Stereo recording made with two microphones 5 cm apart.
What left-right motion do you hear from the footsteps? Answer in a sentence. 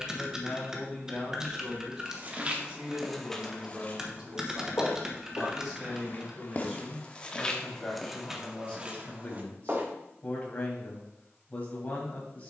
In this clip you hear the footsteps go left and come back.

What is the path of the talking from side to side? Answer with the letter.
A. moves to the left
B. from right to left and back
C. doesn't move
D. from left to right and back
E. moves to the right
D.